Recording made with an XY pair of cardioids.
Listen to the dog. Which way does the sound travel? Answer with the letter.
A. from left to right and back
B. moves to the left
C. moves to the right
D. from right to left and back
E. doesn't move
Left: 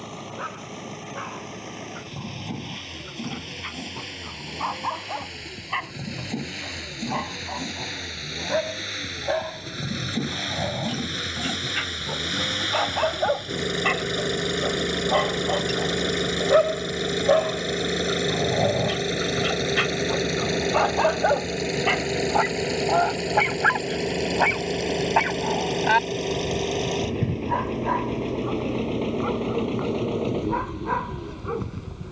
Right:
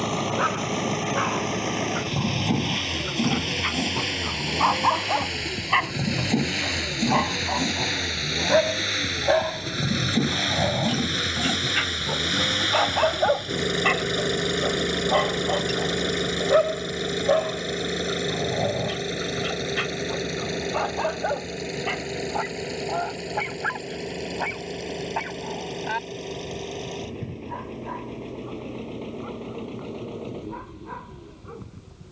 B.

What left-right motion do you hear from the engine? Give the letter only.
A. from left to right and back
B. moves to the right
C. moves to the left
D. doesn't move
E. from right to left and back
C.